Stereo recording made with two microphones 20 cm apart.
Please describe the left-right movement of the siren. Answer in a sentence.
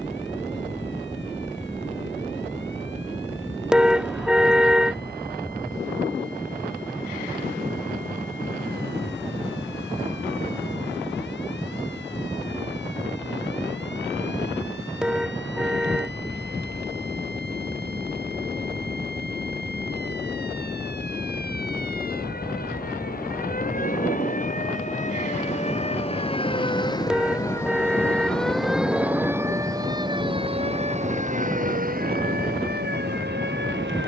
In this clip you hear the siren move from left to right.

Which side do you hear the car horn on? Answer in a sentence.
In this clip you hear the car horn in the centre.